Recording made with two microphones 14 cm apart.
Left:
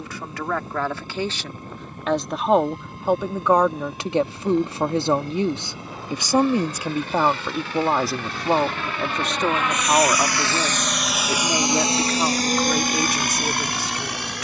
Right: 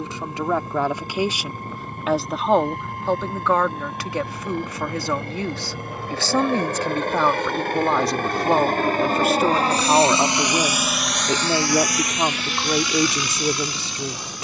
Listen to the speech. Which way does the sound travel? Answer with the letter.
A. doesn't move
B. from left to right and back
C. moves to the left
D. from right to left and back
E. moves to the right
D.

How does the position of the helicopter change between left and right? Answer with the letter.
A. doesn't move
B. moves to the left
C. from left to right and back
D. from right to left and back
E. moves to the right
B.